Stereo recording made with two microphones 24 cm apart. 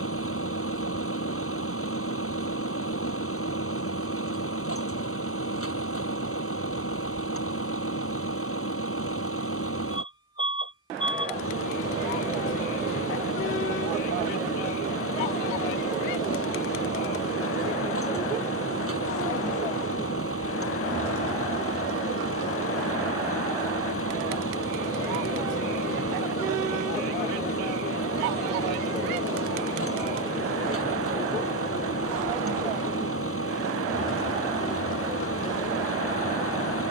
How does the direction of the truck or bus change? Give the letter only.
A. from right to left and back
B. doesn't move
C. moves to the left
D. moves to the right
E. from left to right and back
B.